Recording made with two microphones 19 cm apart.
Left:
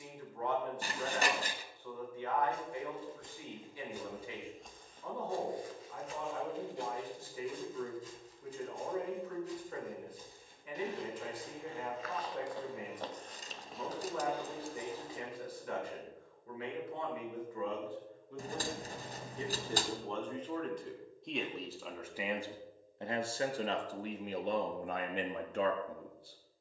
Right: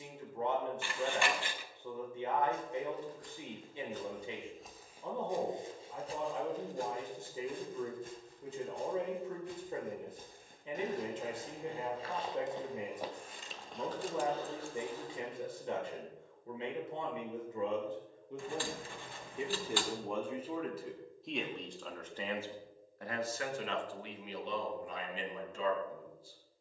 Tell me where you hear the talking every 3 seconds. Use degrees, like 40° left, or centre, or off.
20° right, 20° right, 20° right, 20° right, 20° right, 20° right, 10° right, 20° left, 60° left.